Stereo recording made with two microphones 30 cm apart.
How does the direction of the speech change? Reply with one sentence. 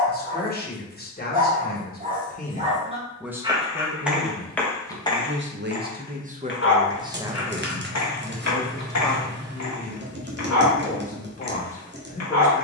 In this clip you hear the speech move from left to right and back again.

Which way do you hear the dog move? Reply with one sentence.
You can hear the dog move from right to left.